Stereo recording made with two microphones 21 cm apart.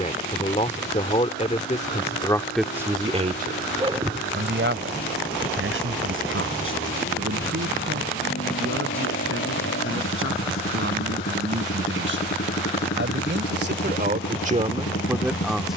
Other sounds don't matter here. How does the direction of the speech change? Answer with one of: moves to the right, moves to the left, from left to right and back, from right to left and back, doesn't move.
from left to right and back.